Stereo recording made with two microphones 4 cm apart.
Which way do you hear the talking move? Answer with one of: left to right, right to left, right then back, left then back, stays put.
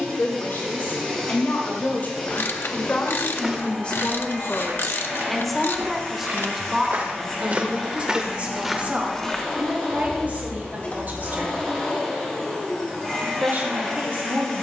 left to right.